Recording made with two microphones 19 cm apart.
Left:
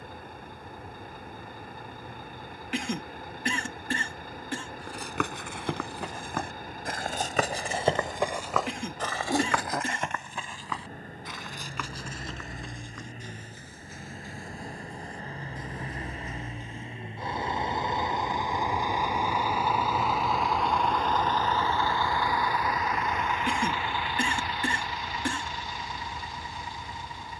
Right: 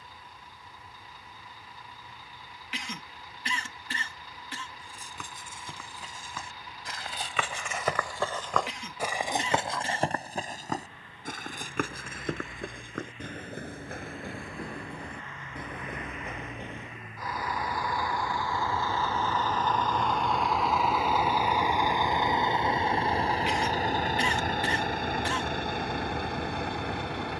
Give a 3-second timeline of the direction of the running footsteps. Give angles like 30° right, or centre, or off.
off, 70° left, 40° left, 40° right, 60° right, 70° right, off, off, off.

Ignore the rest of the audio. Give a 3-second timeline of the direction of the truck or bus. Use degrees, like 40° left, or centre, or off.
60° left, 50° left, 50° left, 50° left, 40° left, 30° left, 10° left, 20° right, 60° right.